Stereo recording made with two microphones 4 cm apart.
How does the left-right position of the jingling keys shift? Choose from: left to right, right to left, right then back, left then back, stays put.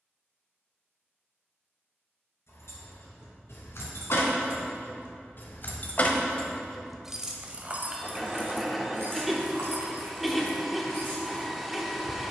left to right.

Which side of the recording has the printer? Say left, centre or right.
centre.